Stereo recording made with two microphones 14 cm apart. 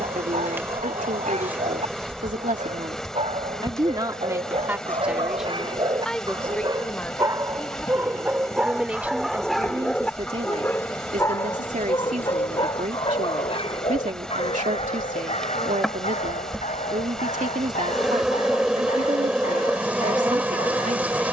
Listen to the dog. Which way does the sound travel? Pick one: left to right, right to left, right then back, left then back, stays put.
right to left.